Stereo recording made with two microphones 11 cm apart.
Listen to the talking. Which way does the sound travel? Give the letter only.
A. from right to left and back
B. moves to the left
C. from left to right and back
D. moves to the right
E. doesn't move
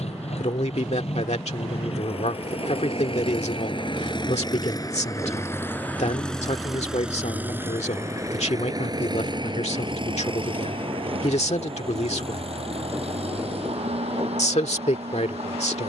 E.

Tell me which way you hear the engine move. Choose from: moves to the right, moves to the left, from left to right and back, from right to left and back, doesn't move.
moves to the right.